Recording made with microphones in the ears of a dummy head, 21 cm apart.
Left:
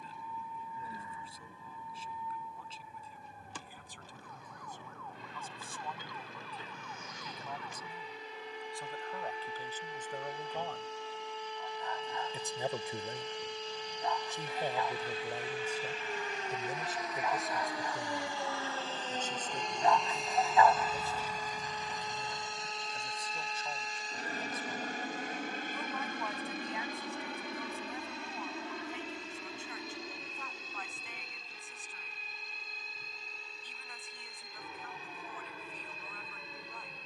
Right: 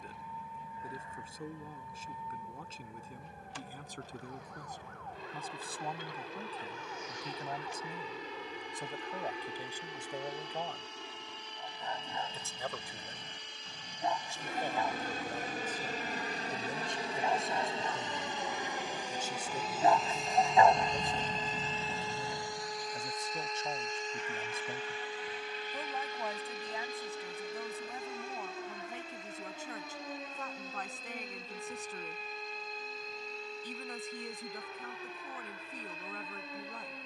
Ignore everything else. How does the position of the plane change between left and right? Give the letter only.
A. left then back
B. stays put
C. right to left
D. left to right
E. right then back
C.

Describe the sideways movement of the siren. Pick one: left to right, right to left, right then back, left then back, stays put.
left to right.